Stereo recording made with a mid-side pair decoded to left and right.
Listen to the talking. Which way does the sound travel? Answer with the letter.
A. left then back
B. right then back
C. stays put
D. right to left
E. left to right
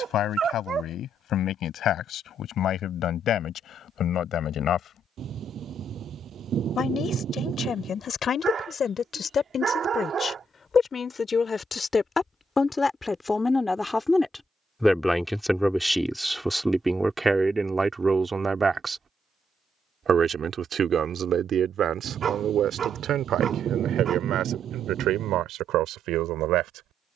E.